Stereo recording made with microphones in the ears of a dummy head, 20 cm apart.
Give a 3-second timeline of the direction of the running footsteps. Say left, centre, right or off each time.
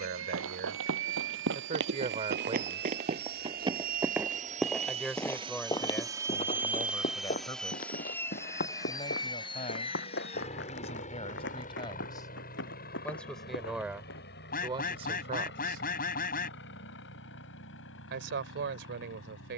right, centre, left, left, left, off, off.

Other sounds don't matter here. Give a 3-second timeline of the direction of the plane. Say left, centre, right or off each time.
right, right, centre, left, left, left, left.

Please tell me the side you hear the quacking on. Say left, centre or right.
left.